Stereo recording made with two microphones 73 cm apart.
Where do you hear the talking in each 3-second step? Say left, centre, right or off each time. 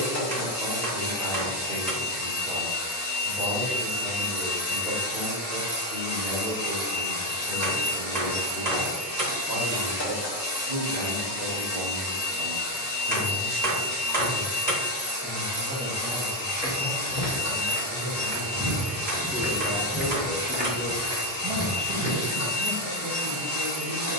right, right, right, right, right, centre, centre, right.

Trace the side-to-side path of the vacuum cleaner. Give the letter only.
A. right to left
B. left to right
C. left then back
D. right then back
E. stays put
E.